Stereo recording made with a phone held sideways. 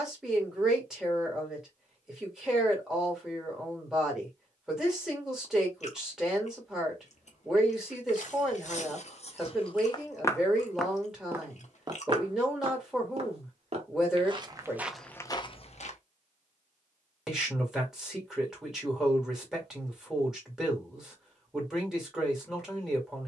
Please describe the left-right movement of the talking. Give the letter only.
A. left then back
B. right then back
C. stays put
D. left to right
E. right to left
C.